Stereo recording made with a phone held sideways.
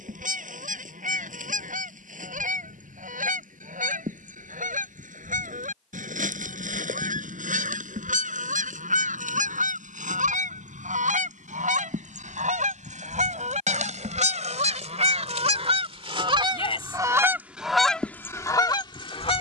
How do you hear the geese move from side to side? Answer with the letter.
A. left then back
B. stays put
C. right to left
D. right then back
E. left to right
C.